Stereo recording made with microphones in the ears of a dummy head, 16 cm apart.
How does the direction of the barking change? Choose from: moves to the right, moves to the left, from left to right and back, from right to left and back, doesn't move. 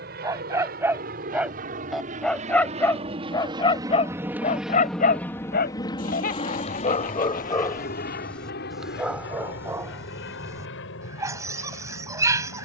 from right to left and back.